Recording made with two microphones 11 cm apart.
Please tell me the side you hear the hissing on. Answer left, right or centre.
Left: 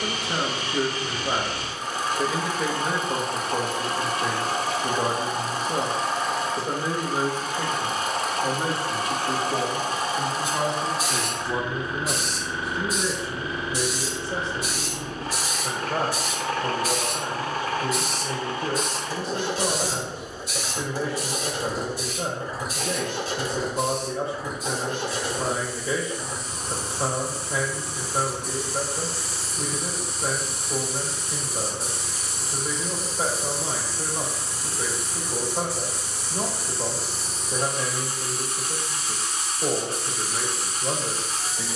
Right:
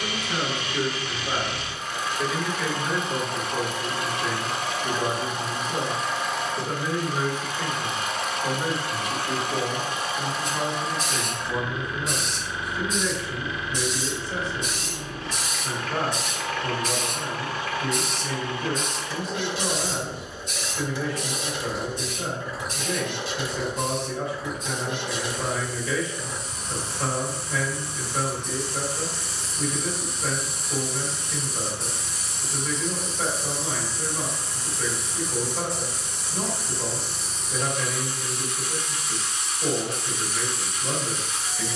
centre.